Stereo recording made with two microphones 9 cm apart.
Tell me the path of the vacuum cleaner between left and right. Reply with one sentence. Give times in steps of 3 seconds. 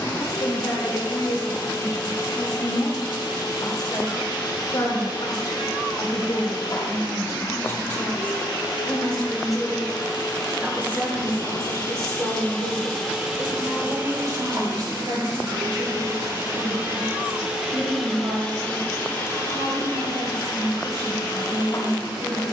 You can hear the vacuum cleaner on the left from 0 s, in the centre from 12 s, on the right from 15 s and on the left from 18 s.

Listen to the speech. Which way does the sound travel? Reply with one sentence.
You can hear the speech move to the right.